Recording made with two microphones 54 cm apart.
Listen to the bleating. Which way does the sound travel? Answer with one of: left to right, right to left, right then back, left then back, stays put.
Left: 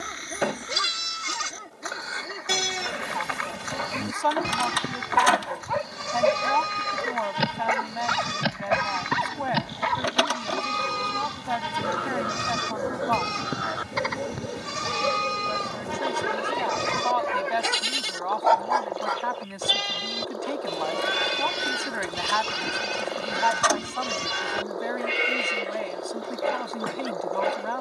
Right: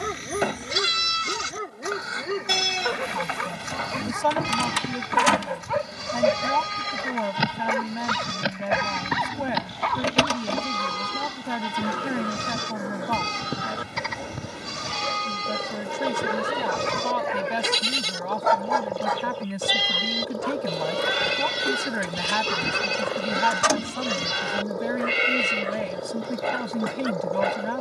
stays put.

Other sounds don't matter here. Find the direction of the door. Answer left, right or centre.
right.